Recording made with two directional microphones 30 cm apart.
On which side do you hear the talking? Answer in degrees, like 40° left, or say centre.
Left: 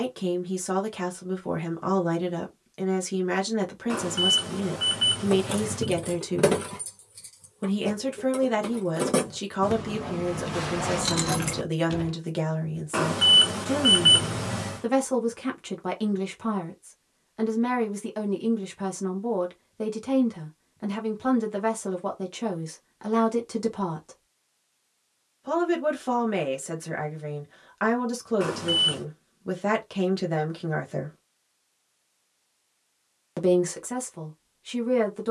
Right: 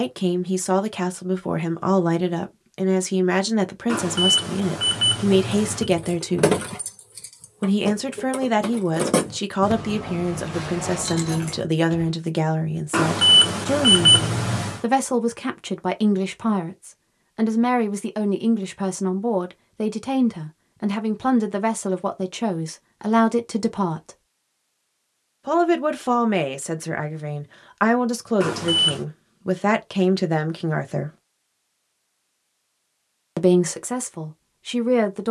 40° right.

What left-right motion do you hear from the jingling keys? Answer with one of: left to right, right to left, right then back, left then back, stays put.
right then back.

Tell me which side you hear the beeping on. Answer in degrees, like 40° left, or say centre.
30° right.